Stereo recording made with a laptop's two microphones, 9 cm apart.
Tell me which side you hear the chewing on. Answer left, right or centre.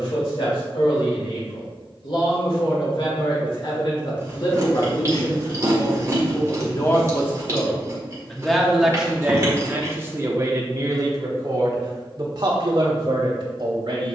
right.